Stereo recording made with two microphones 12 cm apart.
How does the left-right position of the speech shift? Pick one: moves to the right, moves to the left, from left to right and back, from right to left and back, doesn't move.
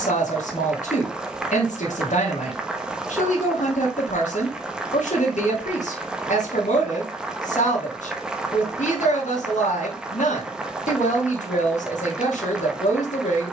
doesn't move.